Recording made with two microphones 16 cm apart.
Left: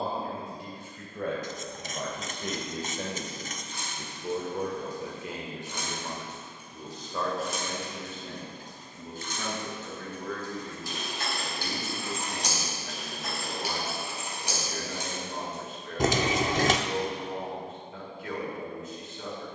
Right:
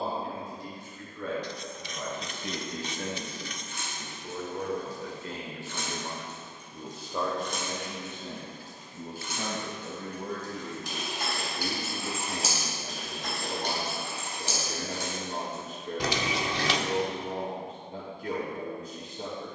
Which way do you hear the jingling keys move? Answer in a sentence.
In this clip you hear the jingling keys move from left to right and back again.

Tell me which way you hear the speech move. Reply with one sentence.
You can hear the speech move to the right.